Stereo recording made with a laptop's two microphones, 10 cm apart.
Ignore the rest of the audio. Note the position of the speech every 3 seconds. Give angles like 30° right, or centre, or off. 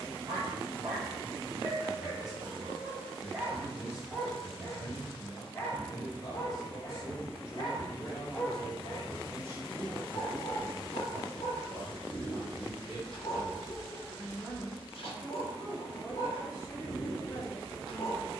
40° left, 40° left, 30° left, 40° right, centre, 30° left.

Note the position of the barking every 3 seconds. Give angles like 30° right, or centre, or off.
20° right, centre, 40° left, 60° left, 60° left, 60° left.